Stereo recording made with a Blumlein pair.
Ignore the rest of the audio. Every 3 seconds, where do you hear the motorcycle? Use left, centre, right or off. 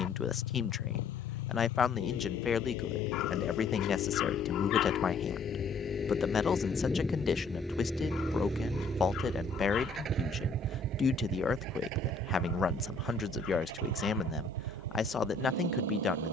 left, left, centre, right, right, right.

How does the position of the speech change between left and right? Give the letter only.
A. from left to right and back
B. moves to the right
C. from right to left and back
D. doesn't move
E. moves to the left
D.